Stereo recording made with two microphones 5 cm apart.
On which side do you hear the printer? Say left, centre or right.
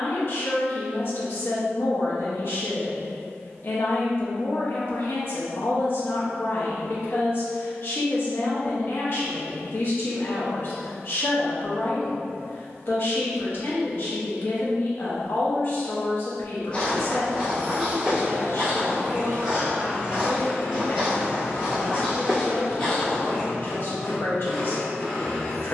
centre.